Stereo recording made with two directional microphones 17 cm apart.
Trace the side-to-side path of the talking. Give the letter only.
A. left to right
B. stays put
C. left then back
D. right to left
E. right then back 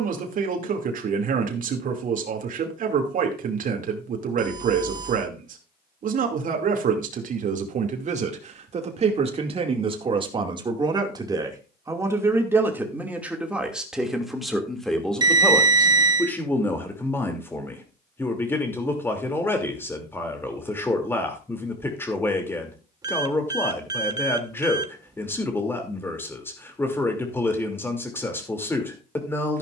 D.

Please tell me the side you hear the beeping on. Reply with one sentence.
You can hear the beeping on the right.